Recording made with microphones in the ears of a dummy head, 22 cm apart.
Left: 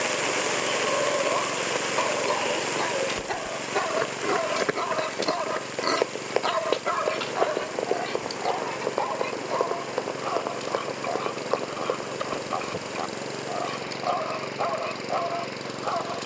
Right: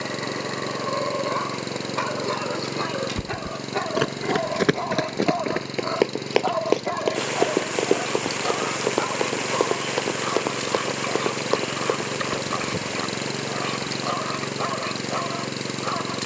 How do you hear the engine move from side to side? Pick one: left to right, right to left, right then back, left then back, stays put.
stays put.